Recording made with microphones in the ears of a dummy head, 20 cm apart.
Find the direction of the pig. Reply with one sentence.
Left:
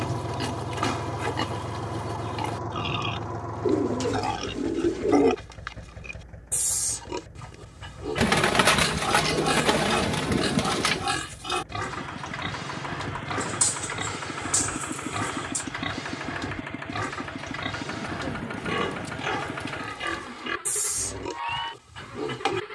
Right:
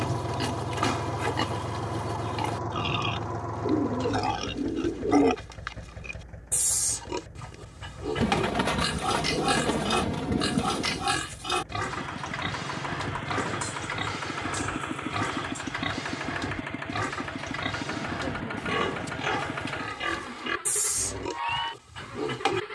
You can hear the pig in the centre.